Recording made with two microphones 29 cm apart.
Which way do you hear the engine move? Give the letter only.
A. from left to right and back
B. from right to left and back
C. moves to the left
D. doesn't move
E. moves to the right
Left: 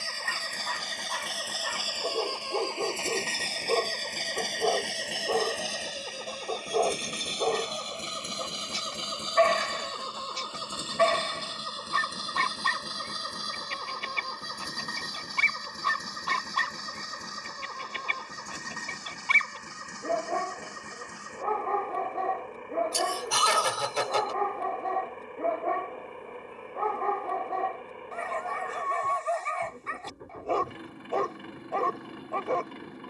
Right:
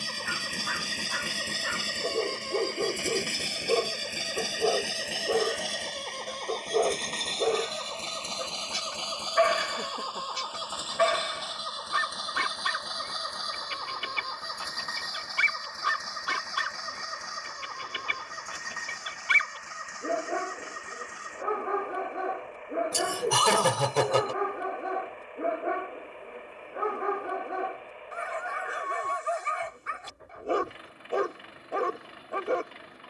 C.